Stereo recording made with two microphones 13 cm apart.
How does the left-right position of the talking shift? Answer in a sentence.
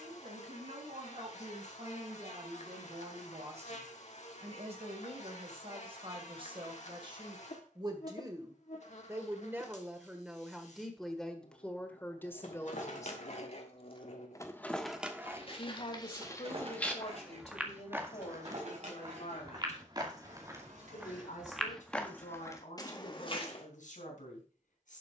You can hear the talking move from right to left.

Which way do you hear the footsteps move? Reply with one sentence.
In this clip you hear the footsteps move from left to right and back again.